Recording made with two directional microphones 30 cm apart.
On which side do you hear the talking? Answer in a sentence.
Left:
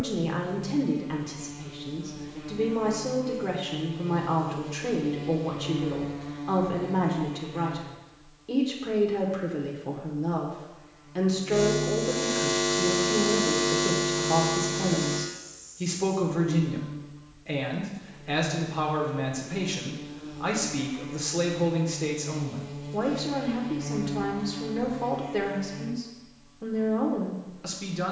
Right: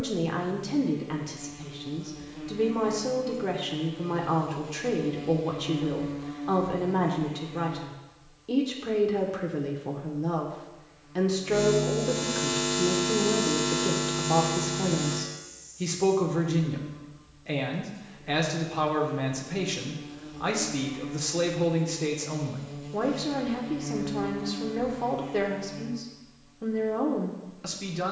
You can hear the talking in the centre.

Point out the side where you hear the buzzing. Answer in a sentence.
You can hear the buzzing in the centre.